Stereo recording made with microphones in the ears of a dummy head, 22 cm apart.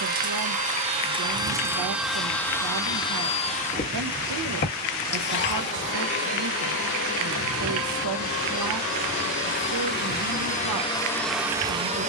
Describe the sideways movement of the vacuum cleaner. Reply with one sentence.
In this clip you hear the vacuum cleaner move from right to left and back again.